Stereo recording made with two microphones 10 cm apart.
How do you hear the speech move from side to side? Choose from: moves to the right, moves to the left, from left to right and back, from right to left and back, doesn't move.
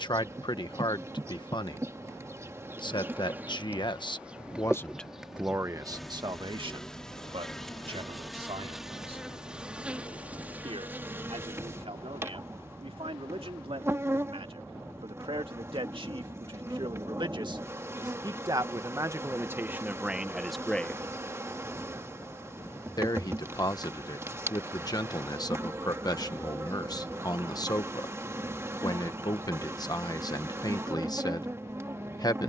from left to right and back.